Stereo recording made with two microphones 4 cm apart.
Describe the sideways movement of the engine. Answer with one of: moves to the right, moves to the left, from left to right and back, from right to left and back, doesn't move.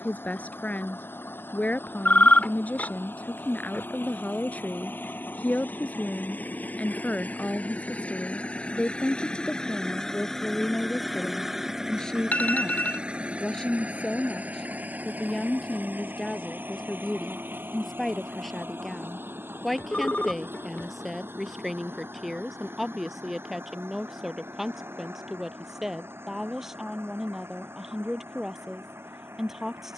moves to the right.